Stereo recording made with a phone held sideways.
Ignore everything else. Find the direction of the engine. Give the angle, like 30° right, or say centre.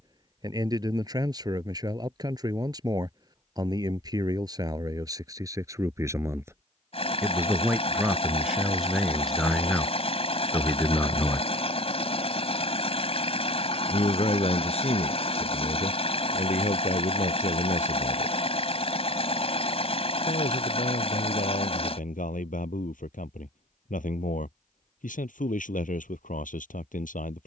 50° left.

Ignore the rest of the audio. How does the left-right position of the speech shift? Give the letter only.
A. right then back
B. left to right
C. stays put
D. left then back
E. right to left
E.